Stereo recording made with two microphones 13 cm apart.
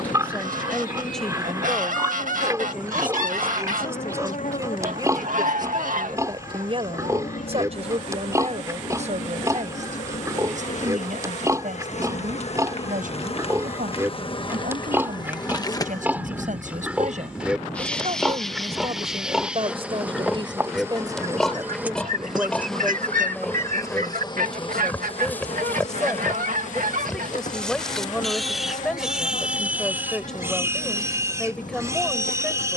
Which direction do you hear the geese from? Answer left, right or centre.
right.